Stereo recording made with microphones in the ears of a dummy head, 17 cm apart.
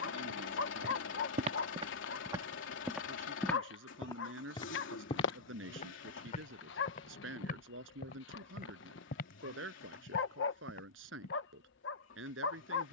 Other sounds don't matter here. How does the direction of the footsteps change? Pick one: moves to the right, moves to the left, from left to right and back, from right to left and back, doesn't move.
moves to the left.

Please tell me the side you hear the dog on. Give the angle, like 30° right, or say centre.
70° left.